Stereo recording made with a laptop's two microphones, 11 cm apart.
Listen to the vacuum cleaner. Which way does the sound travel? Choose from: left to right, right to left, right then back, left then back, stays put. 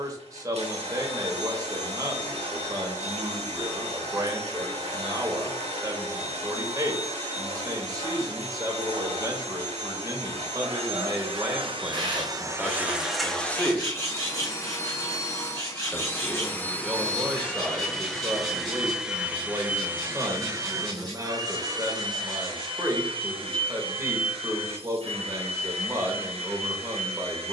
left then back.